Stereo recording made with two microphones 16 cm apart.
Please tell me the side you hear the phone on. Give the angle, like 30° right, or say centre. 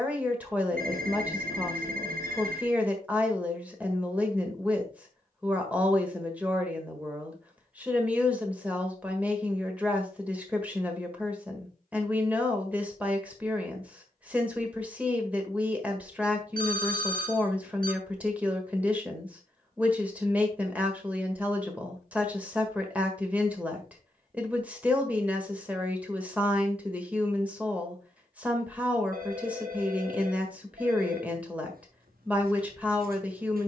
70° right.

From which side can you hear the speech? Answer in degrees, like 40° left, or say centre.
10° right.